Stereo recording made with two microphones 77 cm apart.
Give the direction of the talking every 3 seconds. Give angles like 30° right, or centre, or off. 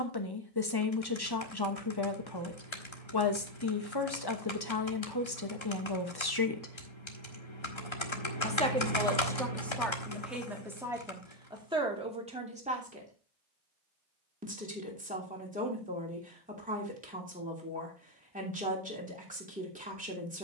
30° left, 30° left, 20° left, centre, 10° right, 10° right, 10° right.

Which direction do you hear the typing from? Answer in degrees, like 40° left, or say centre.
40° left.